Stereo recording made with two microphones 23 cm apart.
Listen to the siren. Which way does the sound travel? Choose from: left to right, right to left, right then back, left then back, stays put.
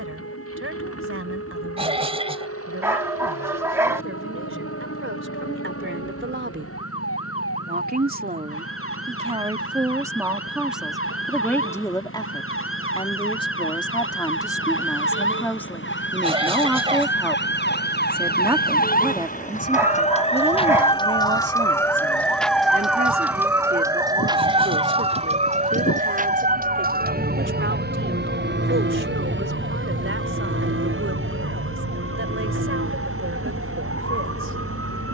left to right.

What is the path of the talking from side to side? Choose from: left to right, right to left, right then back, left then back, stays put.
left then back.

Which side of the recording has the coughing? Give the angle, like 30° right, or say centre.
20° right.